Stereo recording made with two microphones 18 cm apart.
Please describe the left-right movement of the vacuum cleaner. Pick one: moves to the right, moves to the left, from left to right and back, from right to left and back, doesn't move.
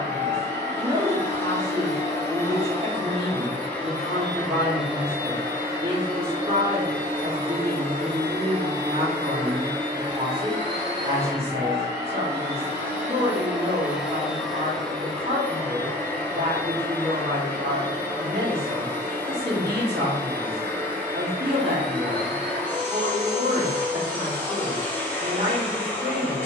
from left to right and back.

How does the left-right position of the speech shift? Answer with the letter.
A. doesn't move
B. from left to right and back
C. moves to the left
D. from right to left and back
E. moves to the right
A.